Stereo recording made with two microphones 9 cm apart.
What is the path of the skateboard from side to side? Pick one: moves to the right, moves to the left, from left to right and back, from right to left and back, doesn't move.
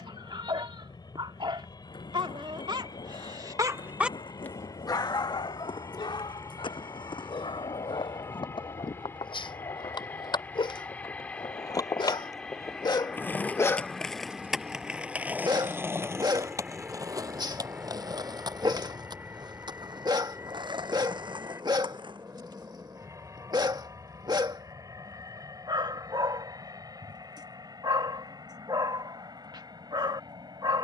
moves to the right.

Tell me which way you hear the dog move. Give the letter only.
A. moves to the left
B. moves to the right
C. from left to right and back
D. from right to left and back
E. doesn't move
D.